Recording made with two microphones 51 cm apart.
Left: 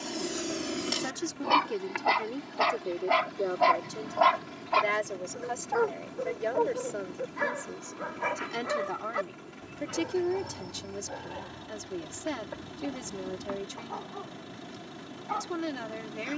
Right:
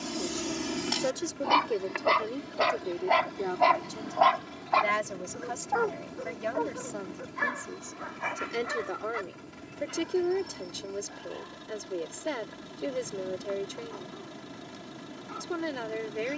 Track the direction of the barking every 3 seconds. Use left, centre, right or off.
centre, left, left, left, left, left.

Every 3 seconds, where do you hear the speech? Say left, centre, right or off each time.
centre, right, centre, left, left, left.